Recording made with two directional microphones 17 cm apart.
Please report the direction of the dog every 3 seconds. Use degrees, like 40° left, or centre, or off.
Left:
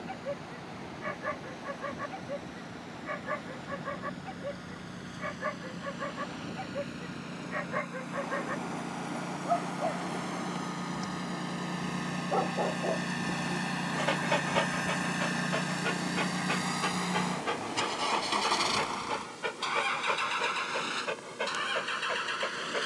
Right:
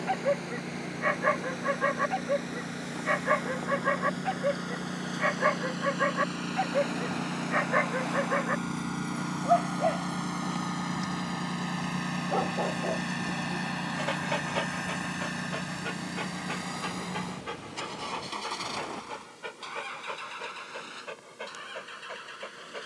60° right, 60° right, 50° right, 20° right, 10° left, 30° left, 40° left, 40° left.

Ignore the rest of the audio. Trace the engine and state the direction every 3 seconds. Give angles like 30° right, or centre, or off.
60° right, 50° right, 40° right, 30° right, centre, 30° left, 50° left, 60° left.